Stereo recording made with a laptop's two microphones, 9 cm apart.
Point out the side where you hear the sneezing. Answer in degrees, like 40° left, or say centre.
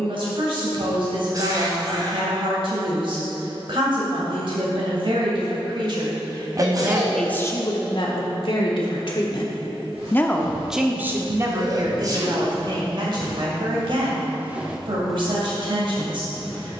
40° right.